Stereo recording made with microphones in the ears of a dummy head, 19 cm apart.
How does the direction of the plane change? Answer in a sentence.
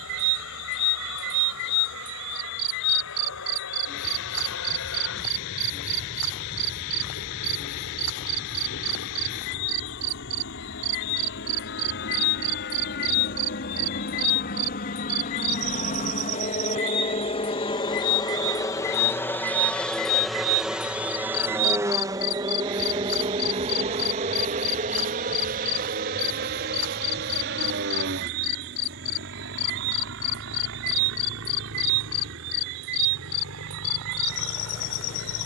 In this clip you hear the plane travel towards the right.